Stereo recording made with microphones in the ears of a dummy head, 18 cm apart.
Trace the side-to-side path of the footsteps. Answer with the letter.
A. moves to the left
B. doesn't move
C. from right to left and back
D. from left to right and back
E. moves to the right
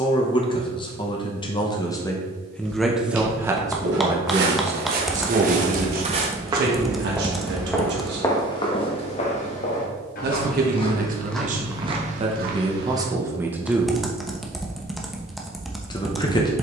C.